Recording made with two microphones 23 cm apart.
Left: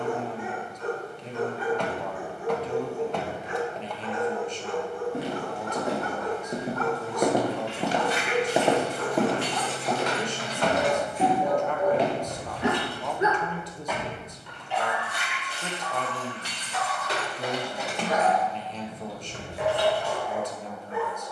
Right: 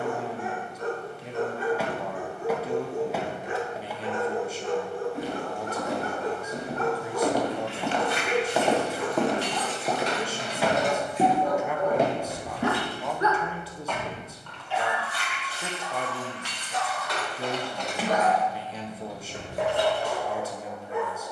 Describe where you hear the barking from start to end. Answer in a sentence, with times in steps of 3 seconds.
In this clip you hear the barking on the right from 0 s, in the centre from 9 s and on the right from 15 s.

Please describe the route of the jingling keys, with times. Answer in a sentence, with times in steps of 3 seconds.
You can hear the jingling keys not at all from 0 s, on the right from 6 s, in the centre from 12 s, on the left from 15 s and on the right from 18 s.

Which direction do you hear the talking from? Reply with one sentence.
In this clip you hear the talking in the centre.